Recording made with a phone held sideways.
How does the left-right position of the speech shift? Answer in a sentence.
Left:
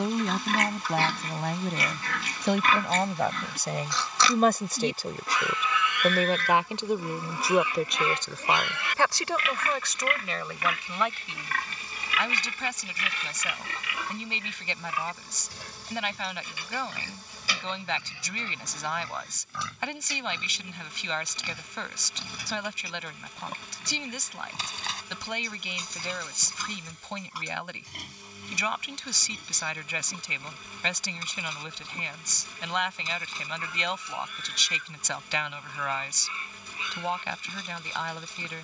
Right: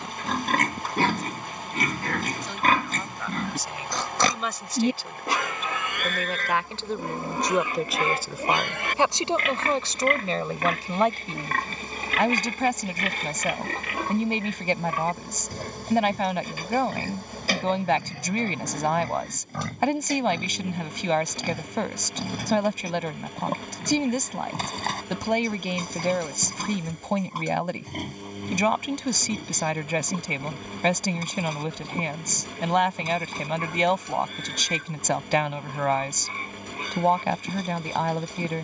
You can hear the speech travel towards the right.